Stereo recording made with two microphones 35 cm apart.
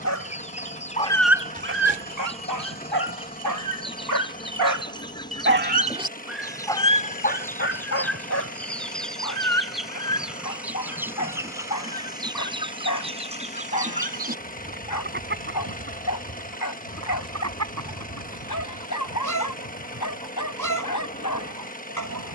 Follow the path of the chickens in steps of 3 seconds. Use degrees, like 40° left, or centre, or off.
20° left, 10° left, 10° left, centre, 20° right, 40° right, 50° right, 60° right.